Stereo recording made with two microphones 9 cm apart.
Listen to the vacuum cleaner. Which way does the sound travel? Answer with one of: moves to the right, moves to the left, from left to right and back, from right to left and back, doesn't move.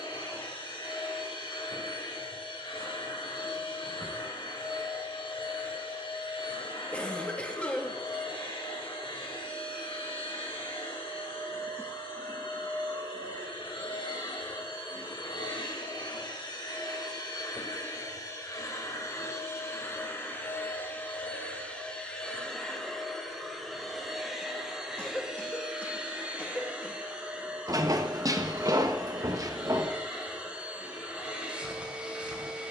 moves to the right.